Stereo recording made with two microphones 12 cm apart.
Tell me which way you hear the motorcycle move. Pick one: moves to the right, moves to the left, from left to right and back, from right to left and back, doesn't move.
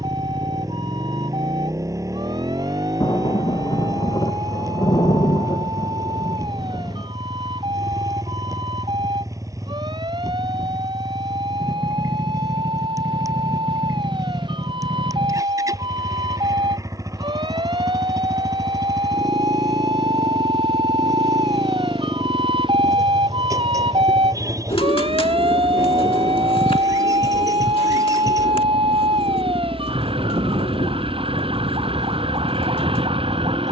doesn't move.